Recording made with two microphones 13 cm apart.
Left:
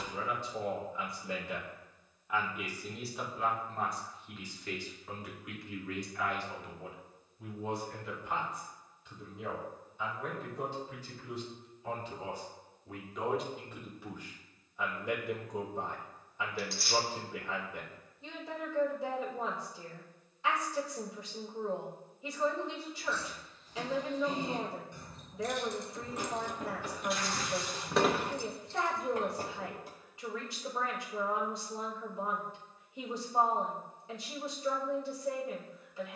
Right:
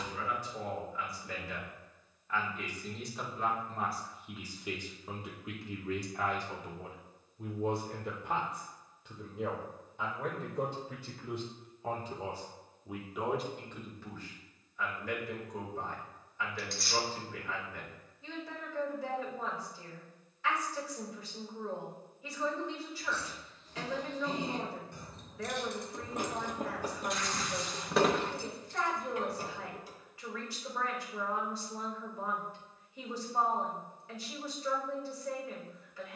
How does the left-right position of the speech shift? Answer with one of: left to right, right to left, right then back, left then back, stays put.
right then back.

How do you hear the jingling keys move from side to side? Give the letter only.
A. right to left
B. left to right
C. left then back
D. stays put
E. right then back
A.